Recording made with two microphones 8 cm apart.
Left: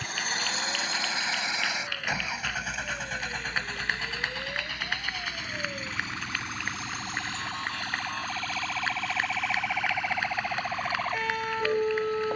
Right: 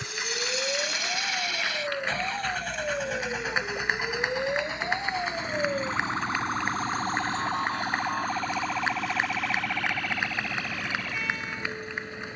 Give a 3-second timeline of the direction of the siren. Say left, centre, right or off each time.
right, right, right, left.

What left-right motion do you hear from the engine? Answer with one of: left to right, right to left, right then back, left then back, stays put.
left to right.